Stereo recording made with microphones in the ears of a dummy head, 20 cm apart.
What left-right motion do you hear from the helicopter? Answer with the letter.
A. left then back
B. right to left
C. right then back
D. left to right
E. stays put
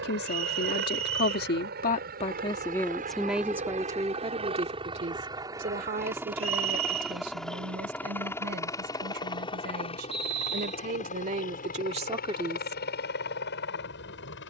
B.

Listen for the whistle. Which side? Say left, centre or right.
right.